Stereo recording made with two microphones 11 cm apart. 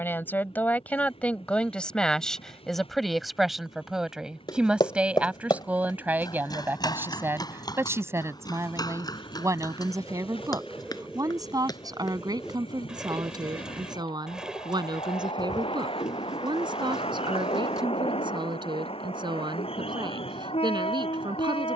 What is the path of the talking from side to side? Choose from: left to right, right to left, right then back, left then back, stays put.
left to right.